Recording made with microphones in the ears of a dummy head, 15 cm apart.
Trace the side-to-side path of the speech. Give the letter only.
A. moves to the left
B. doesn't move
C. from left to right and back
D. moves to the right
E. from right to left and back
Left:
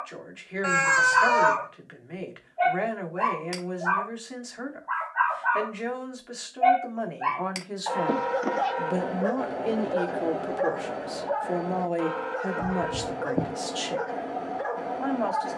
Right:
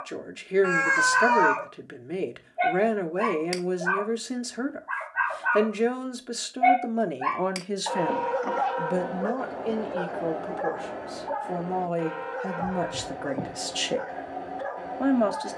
E.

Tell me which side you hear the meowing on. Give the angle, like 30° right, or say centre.
40° left.